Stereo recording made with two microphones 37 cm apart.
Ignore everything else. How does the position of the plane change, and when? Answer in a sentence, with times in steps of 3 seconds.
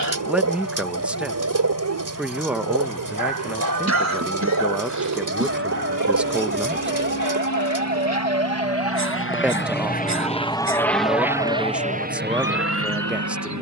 In this clip you hear the plane on the left from 0 s, in the centre from 9 s and on the right from 12 s.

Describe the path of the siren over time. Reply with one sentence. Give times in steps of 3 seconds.
In this clip you hear the siren on the right from 0 s, in the centre from 9 s and on the left from 12 s.